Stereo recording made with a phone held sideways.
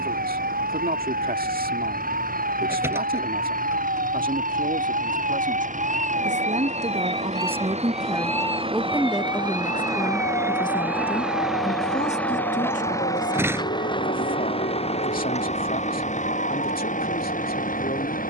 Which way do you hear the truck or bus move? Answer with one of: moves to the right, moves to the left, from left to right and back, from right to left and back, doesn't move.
moves to the left.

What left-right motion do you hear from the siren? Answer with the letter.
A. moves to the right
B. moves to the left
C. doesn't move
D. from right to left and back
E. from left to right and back
B.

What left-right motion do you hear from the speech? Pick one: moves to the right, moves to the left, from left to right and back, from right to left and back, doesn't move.
moves to the left.